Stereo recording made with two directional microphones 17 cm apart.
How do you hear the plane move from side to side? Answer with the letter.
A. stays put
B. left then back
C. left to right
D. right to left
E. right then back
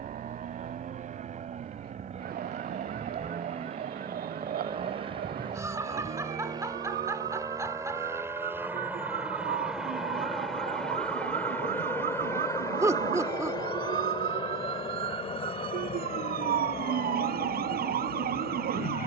D.